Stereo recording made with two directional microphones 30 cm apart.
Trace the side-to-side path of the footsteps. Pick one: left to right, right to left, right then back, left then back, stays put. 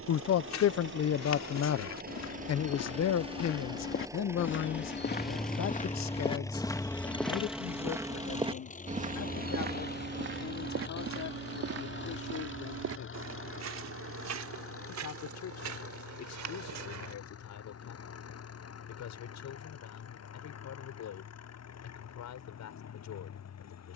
left to right.